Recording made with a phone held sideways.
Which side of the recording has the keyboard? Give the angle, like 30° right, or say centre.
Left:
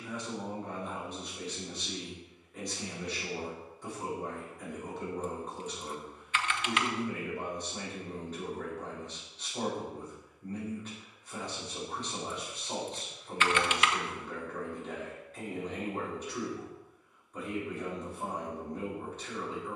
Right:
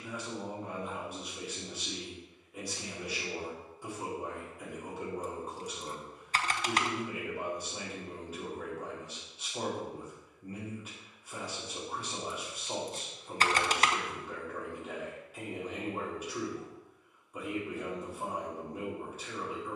40° right.